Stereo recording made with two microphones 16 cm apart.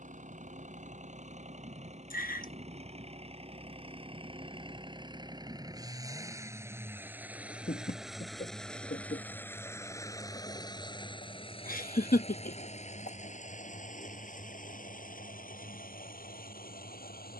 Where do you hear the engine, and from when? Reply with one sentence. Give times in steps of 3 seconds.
You can hear the engine on the right from 0 s, in the centre from 6 s and on the left from 9 s.